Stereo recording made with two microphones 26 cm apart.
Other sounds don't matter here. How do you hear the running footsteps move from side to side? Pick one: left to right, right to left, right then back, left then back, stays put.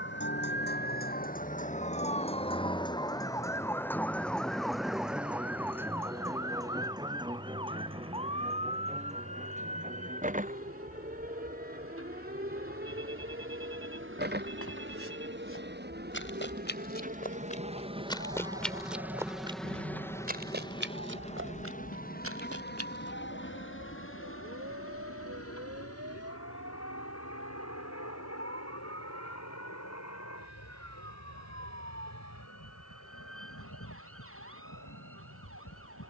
left to right.